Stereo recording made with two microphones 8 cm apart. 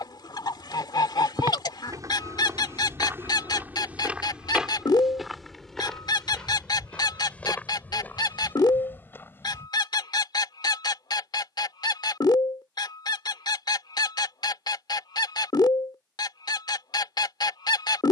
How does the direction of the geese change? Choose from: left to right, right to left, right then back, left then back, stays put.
stays put.